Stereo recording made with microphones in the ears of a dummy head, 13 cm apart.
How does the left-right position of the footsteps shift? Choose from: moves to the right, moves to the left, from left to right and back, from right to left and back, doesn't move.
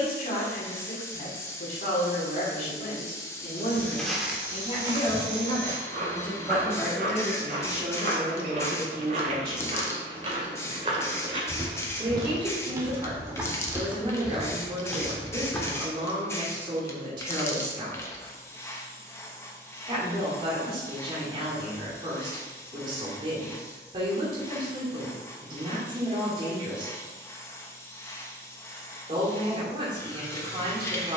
from left to right and back.